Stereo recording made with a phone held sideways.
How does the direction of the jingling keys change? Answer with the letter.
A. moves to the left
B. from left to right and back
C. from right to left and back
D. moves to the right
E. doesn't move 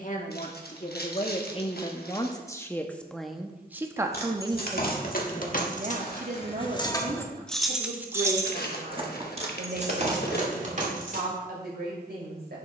D.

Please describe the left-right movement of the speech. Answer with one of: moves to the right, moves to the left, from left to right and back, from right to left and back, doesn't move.
moves to the right.